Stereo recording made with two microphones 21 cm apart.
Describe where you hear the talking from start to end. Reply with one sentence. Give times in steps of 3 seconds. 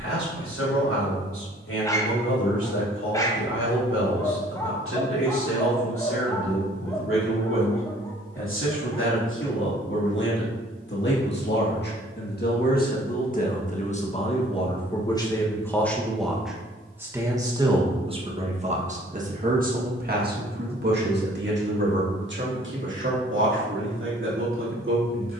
In this clip you hear the talking on the left from 0 s, in the centre from 15 s and on the right from 18 s.